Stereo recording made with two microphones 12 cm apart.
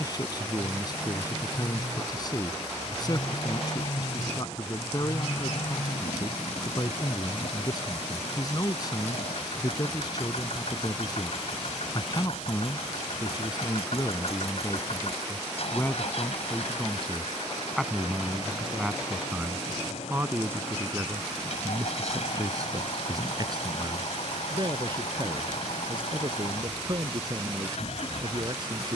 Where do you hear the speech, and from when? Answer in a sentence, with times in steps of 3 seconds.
You can hear the speech on the left from 0 s, in the centre from 15 s and on the right from 21 s.